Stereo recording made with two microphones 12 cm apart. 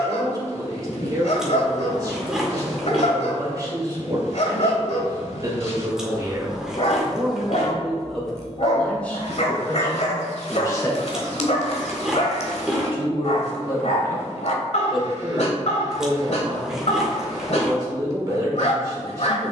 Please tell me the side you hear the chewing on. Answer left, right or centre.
centre.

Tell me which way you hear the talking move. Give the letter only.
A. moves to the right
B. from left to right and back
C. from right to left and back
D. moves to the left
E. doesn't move
C.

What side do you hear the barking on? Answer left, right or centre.
left.